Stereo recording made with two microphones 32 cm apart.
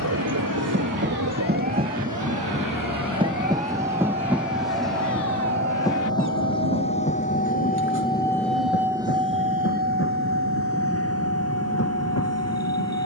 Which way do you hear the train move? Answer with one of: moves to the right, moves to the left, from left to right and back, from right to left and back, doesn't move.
moves to the left.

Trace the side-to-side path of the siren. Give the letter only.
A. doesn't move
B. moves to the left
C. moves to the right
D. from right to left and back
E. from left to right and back
C.